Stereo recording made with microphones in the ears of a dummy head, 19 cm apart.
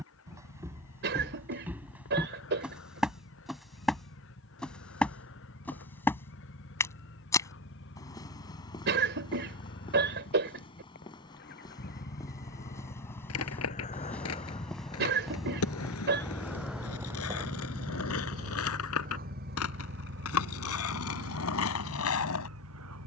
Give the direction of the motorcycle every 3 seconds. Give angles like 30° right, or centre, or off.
70° left, 60° left, 60° left, 50° left, 40° left, centre, 40° right, 70° right.